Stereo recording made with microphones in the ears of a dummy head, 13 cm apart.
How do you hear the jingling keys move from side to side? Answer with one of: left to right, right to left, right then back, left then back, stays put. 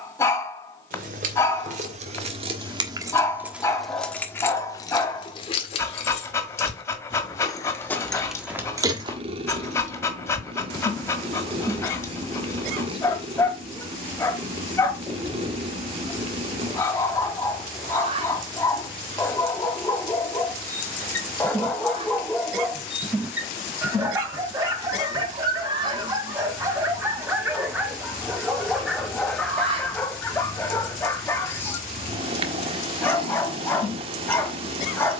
left then back.